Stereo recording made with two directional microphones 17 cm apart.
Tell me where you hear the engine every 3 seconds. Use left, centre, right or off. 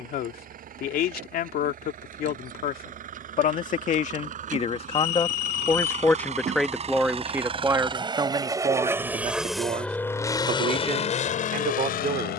right, right, right, left.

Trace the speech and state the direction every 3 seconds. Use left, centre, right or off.
left, left, centre, right.